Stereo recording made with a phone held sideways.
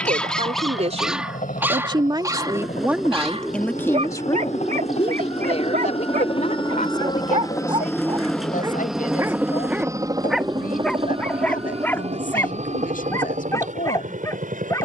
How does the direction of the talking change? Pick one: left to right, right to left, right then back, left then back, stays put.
right to left.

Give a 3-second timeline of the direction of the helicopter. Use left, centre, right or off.
left, left, left, right, right.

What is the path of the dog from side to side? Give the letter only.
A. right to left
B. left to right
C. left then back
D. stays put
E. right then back
E.